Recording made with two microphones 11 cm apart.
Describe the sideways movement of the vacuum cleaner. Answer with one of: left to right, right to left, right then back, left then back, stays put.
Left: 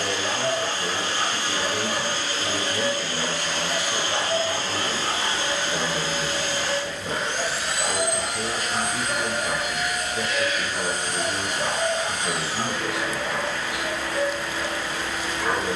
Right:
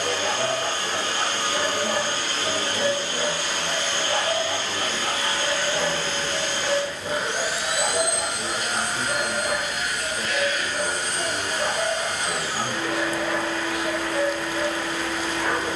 left then back.